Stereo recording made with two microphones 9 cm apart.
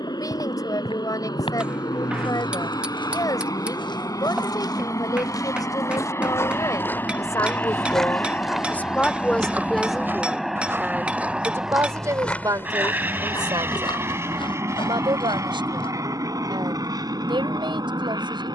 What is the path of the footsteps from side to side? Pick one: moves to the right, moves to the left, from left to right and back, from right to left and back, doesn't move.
from left to right and back.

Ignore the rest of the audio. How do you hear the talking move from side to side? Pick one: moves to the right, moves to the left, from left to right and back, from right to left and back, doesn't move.
moves to the right.